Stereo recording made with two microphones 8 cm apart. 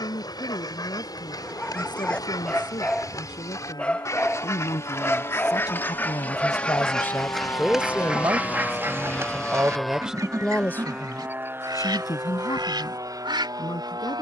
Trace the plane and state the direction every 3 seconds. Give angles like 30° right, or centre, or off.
70° left, 60° left, 40° left, 10° right, 50° right.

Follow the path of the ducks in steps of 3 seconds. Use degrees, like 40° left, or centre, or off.
60° left, 40° left, centre, 50° right, 70° right.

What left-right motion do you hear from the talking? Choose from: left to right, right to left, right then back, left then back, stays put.
right then back.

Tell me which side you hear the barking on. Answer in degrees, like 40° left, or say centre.
10° left.